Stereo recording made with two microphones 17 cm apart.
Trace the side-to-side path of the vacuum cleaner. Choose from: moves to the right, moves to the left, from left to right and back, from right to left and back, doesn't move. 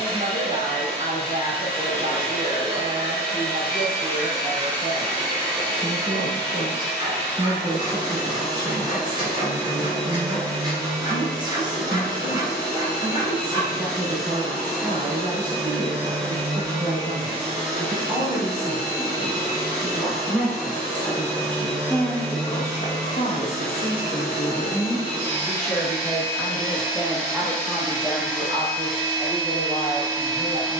doesn't move.